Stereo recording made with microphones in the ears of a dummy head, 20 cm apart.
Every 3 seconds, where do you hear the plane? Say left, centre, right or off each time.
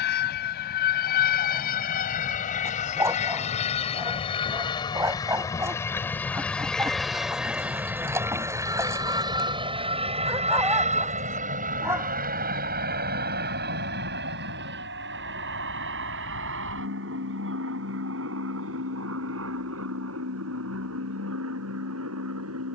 left, left, centre, right, right, right, right, right.